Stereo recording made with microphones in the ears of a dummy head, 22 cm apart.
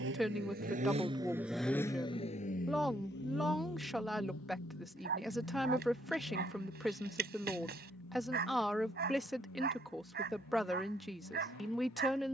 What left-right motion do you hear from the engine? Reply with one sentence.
You can hear the engine move to the left.